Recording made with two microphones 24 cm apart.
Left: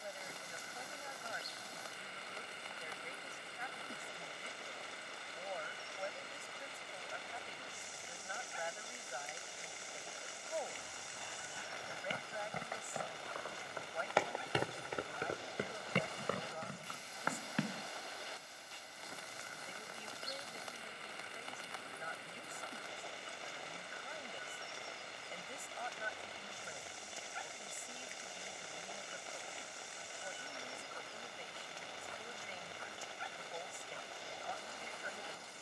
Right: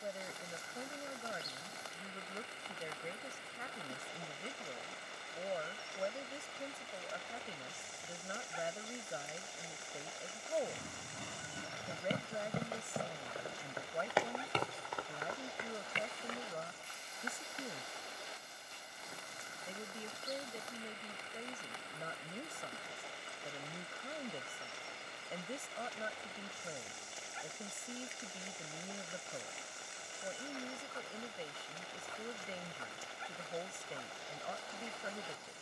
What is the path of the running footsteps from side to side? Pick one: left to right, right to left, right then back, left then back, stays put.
right to left.